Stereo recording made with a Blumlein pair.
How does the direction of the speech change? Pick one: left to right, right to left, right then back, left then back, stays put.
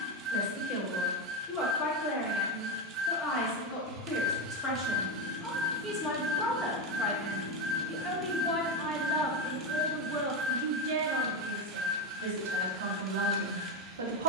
left to right.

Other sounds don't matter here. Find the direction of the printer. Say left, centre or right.
right.